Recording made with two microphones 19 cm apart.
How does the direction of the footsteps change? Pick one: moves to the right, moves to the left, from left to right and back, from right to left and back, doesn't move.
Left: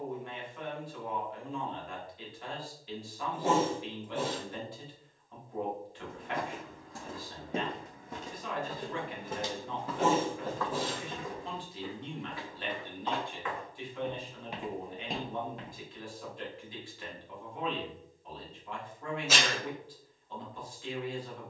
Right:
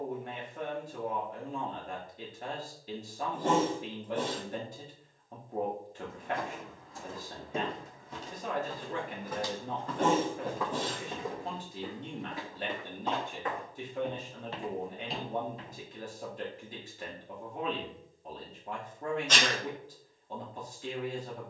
from left to right and back.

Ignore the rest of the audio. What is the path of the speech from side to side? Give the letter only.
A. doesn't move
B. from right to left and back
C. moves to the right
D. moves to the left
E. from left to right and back
A.